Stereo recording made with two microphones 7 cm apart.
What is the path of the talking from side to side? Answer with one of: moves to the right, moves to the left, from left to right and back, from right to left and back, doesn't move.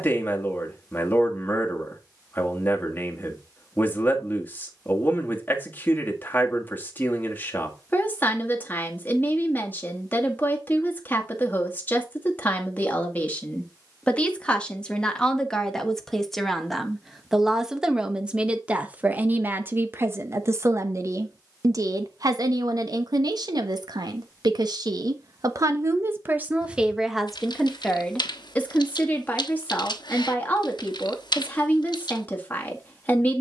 from left to right and back.